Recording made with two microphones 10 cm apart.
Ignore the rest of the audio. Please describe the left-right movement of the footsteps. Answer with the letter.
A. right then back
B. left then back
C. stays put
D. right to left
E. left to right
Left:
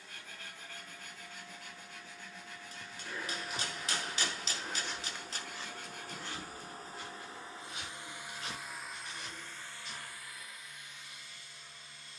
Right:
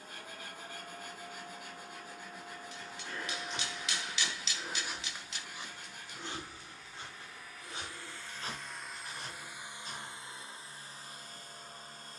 E.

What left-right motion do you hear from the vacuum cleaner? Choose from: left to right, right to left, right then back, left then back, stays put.
left then back.